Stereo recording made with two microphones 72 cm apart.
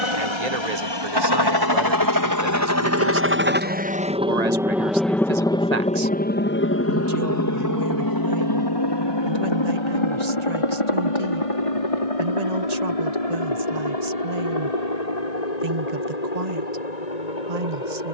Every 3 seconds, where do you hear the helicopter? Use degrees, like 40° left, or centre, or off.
30° right, centre, 20° left, 40° left, 50° left, 60° left.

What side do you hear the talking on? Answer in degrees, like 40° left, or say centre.
60° right.